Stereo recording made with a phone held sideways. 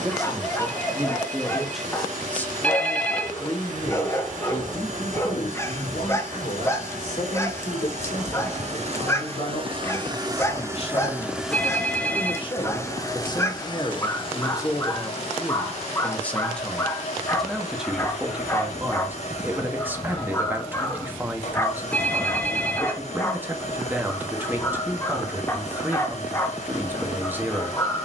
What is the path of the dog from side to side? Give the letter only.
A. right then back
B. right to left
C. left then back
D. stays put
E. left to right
D.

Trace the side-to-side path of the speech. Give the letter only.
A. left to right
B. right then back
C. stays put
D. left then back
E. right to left
D.